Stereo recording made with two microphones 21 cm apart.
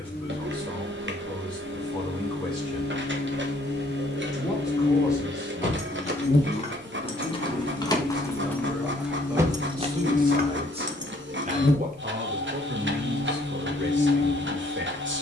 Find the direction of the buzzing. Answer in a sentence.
You can hear the buzzing on the left.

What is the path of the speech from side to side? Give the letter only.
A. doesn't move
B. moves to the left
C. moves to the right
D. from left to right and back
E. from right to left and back
C.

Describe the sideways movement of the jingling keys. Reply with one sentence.
In this clip you hear the jingling keys travel towards the right.